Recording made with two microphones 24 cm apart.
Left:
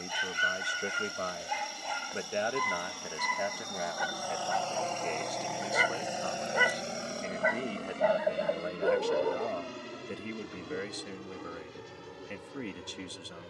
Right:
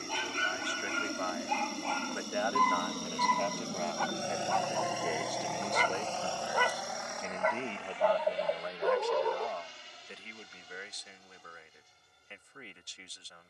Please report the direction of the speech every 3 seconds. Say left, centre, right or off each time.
left, centre, centre, left, left.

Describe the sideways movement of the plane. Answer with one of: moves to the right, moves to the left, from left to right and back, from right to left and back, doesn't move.
moves to the left.